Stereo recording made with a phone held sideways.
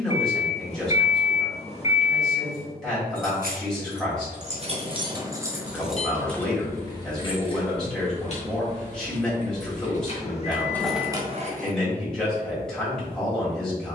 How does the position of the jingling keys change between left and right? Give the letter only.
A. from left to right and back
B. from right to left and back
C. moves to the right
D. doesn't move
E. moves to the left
B.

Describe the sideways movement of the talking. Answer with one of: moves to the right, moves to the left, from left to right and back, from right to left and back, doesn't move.
doesn't move.